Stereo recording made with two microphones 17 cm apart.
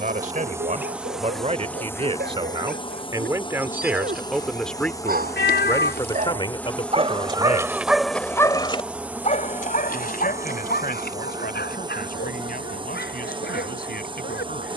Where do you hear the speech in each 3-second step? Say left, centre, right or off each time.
right, centre, left, left, left.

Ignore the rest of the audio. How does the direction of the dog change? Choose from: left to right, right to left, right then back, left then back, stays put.
right to left.